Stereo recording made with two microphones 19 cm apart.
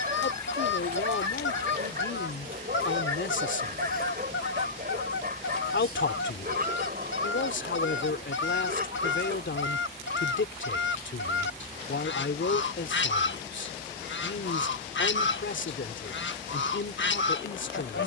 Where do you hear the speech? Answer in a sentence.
In this clip you hear the speech on the left.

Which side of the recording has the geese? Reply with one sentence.
You can hear the geese on the left.